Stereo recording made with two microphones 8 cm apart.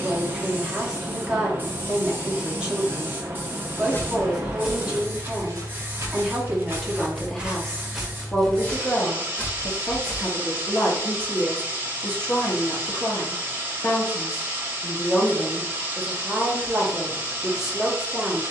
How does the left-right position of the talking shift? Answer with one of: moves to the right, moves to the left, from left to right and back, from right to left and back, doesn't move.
from right to left and back.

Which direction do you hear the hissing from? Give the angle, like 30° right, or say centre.
30° right.